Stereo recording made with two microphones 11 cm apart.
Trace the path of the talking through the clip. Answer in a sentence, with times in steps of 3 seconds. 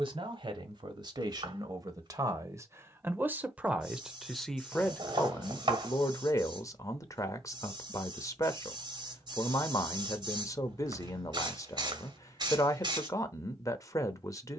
In this clip you hear the talking on the right from 0 s, in the centre from 3 s and on the left from 6 s.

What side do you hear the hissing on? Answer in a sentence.
You can hear the hissing on the right.